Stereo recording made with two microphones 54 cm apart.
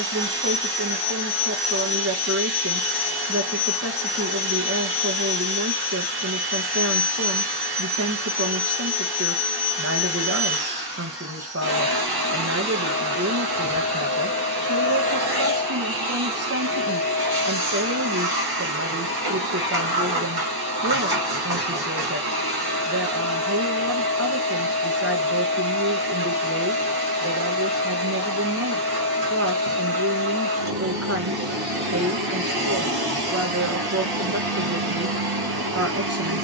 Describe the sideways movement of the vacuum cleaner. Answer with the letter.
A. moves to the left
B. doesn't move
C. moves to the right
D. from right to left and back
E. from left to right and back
B.